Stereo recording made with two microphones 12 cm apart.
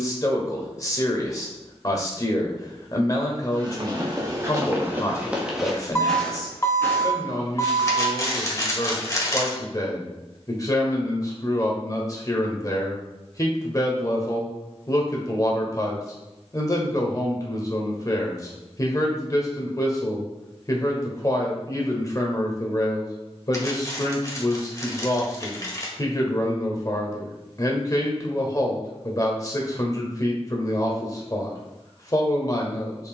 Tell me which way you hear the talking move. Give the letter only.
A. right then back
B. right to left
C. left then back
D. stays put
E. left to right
D.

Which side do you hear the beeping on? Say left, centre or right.
left.